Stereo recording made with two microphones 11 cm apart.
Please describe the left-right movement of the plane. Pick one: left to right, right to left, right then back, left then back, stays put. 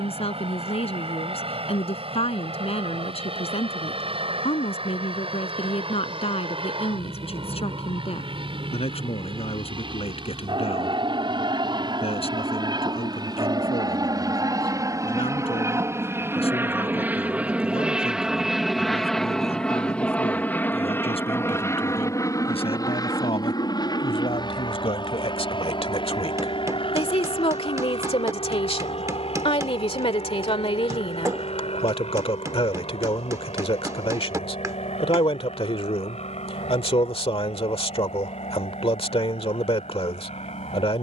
right to left.